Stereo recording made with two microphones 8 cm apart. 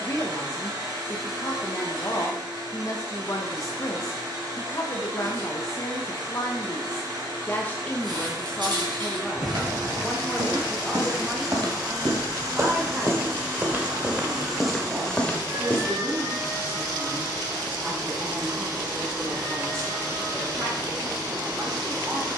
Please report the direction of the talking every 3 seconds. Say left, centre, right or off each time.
left, left, left, centre, right, right, right, right.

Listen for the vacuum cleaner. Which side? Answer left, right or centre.
right.